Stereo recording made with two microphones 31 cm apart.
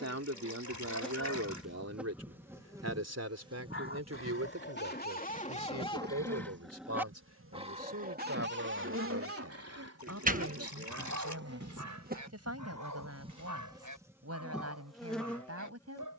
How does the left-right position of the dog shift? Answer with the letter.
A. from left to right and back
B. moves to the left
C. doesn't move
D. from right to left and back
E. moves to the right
E.